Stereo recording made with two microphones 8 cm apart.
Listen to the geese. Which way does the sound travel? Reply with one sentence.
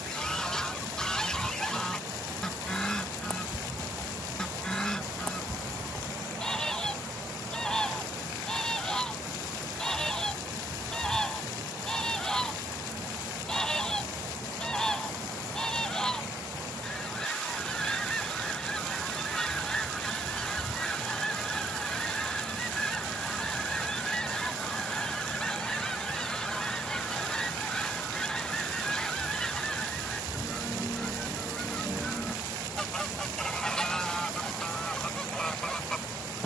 You can hear the geese stay in one place.